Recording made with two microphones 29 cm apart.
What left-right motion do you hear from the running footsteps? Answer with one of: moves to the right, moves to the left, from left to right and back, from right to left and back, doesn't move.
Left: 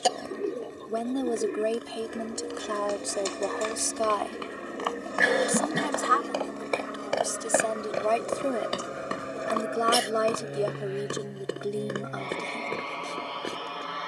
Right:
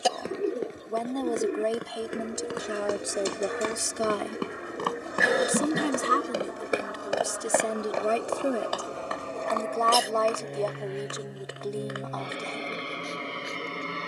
moves to the left.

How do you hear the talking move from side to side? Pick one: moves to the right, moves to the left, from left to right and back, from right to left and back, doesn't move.
from left to right and back.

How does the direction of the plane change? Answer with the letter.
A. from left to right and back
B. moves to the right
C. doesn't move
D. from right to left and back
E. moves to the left
B.